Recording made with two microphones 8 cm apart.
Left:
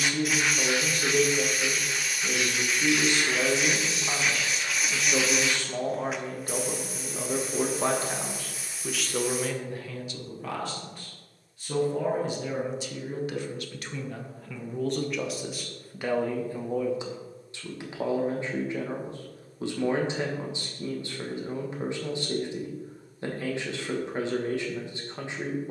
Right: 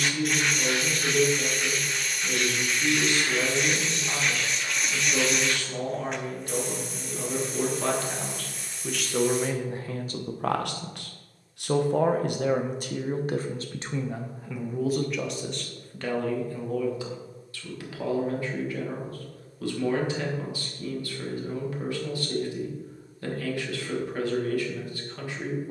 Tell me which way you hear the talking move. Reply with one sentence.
In this clip you hear the talking move from left to right and back again.